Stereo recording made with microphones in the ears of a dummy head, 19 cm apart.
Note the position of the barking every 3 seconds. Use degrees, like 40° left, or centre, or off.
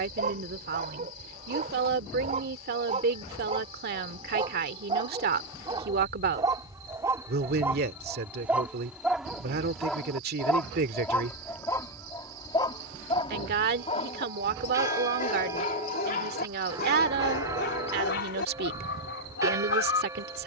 30° right, 20° right, 10° right, 10° left, 30° left, 40° left, 60° left.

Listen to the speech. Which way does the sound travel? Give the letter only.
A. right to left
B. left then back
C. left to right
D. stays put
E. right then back
D.